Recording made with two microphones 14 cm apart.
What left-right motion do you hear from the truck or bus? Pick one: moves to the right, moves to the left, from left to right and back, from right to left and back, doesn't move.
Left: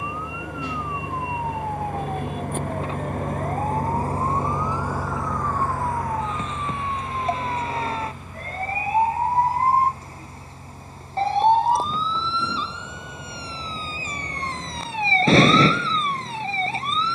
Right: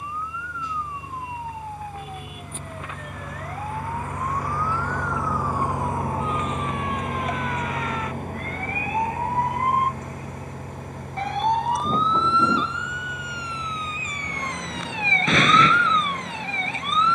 moves to the right.